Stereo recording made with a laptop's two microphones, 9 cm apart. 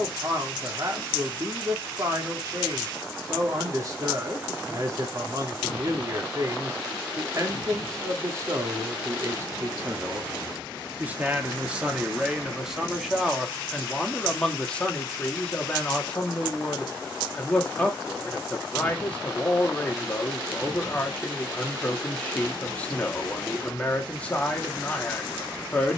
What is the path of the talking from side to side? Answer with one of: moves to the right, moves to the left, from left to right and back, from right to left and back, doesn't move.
moves to the left.